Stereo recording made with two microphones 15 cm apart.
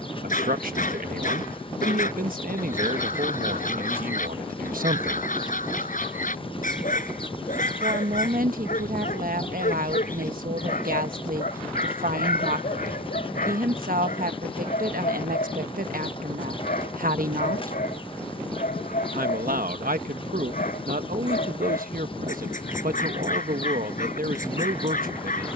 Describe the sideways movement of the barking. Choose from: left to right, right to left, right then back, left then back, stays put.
stays put.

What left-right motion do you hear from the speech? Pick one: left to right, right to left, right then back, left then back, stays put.
stays put.